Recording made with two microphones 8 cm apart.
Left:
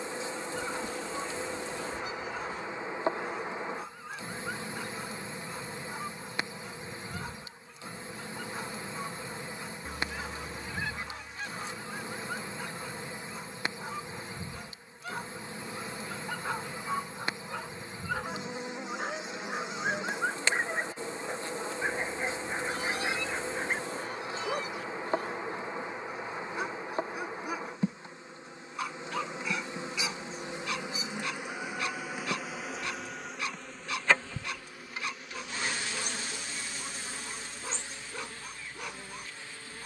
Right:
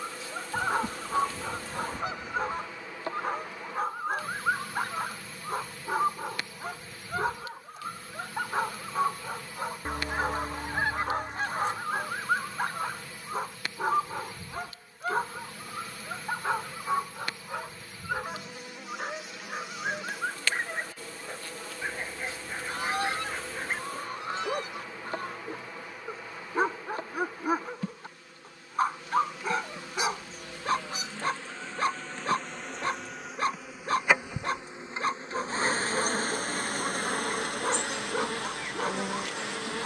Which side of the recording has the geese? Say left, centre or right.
right.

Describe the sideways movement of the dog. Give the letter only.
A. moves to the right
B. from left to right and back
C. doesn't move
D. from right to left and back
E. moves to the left
D.